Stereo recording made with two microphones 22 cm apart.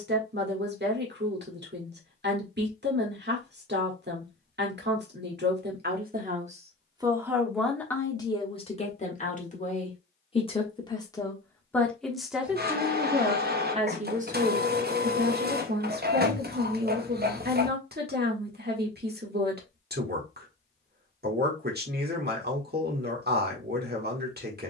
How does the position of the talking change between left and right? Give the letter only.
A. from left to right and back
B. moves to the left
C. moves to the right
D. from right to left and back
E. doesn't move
D.